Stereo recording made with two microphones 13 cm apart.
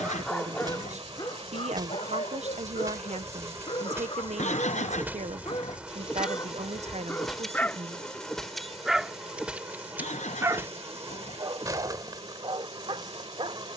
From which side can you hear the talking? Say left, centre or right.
right.